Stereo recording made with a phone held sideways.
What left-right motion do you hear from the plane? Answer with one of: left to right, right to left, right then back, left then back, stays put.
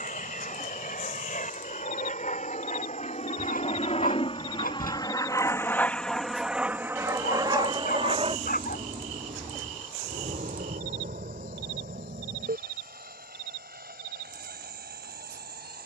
left to right.